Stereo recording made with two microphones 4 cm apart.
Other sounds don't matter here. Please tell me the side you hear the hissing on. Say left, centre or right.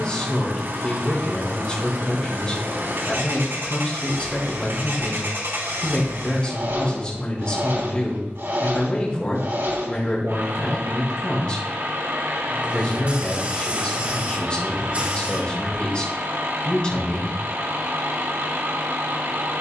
right.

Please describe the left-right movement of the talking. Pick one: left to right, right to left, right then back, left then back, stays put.
stays put.